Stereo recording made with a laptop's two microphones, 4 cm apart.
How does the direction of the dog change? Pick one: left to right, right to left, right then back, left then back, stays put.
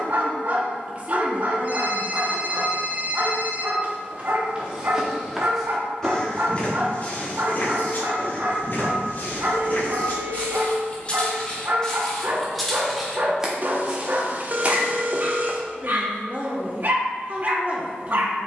stays put.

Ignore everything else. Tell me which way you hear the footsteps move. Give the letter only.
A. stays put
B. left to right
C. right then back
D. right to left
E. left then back
E.